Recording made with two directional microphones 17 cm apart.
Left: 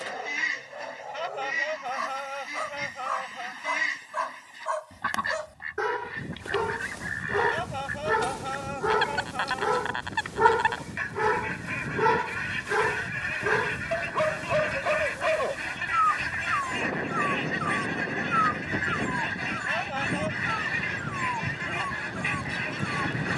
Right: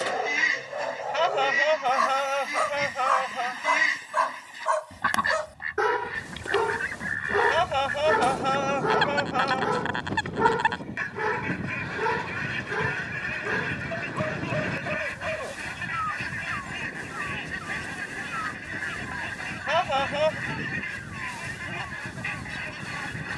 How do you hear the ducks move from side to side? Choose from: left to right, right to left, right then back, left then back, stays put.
right to left.